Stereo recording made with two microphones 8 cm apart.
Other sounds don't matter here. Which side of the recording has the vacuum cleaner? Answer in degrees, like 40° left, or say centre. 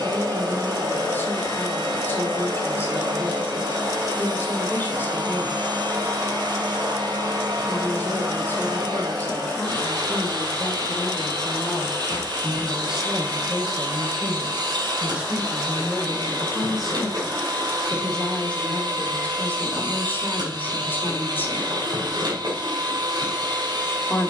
70° right.